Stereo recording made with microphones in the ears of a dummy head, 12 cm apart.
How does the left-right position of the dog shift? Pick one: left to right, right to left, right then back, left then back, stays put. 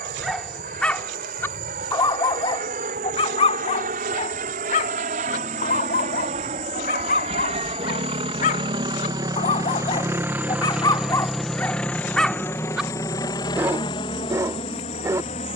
left then back.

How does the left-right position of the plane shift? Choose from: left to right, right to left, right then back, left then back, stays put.
right to left.